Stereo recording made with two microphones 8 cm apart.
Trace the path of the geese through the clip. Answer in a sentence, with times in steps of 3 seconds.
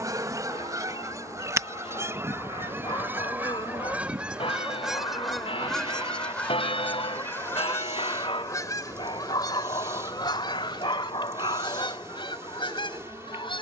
In this clip you hear the geese on the right from 0 s, in the centre from 3 s and on the left from 6 s.